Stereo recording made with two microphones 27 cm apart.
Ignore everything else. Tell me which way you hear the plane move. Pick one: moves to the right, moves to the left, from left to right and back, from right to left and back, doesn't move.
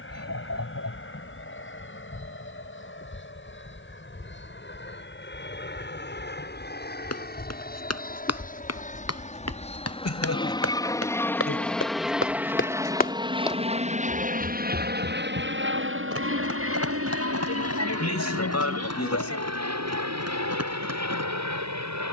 moves to the right.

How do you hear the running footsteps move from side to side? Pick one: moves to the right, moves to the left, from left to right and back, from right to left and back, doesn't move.
moves to the right.